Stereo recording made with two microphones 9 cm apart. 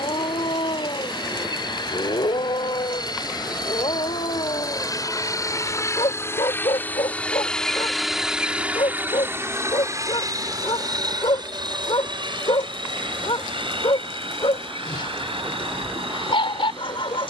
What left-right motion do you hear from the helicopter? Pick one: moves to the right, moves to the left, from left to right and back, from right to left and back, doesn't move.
moves to the right.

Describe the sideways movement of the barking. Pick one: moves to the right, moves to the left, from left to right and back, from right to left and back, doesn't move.
doesn't move.